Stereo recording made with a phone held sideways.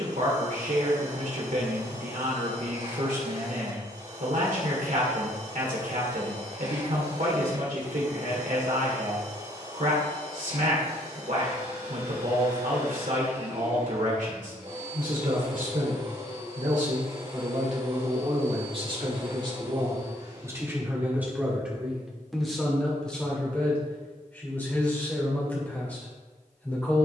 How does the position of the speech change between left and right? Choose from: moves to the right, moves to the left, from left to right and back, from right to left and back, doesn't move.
moves to the left.